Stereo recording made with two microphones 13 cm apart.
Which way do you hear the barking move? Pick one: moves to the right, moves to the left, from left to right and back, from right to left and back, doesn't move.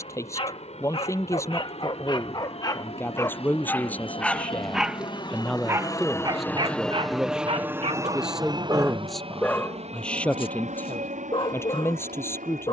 from left to right and back.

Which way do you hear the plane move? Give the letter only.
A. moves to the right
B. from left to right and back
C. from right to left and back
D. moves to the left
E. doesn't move
A.